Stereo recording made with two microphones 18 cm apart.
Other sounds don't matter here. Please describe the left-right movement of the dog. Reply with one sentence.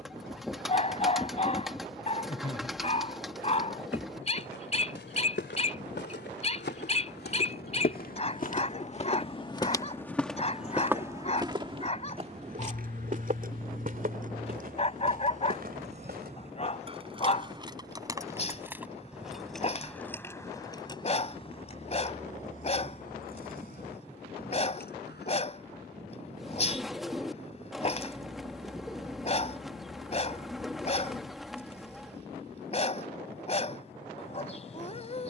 In this clip you hear the dog stay in one place.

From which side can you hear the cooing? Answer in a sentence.
In this clip you hear the cooing in the centre.